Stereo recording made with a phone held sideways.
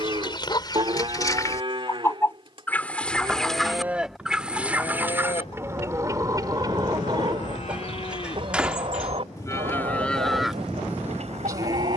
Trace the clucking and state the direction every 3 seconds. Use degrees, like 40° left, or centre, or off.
30° left, 10° right, 30° right, 50° right.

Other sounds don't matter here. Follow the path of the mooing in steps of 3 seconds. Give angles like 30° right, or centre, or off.
40° right, 10° left, 50° left, centre.